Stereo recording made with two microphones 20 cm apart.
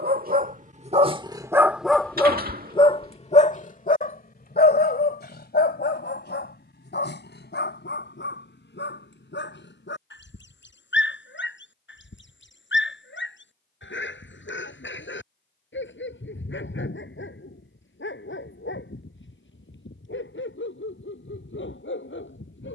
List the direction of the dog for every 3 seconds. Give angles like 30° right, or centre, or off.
10° right, 50° left, 60° left, 70° left, 70° left, 70° left, 70° left, 70° left.